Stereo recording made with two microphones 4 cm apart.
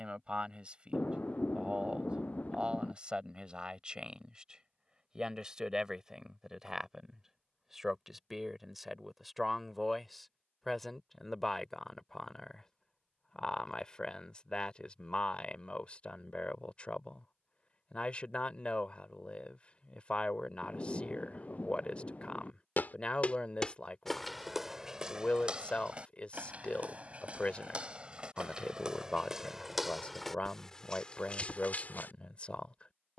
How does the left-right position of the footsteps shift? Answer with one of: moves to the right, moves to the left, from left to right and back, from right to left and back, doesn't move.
from left to right and back.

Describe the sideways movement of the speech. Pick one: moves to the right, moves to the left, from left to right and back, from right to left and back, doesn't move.
moves to the left.